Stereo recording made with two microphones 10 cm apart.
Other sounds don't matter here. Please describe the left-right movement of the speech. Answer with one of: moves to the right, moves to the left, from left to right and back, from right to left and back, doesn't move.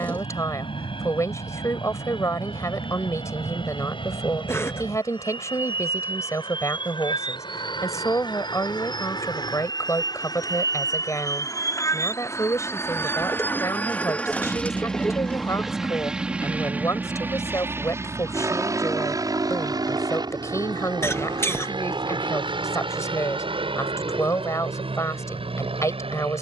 doesn't move.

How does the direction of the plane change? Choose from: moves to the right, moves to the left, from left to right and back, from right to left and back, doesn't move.
moves to the right.